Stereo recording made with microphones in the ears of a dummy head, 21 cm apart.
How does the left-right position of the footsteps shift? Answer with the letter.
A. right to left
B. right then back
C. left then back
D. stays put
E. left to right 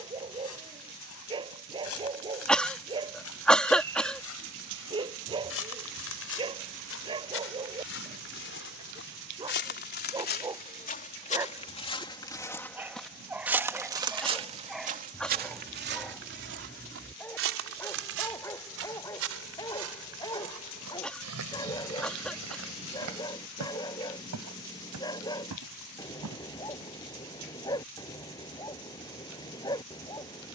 E.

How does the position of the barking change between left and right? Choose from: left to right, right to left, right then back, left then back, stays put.
right to left.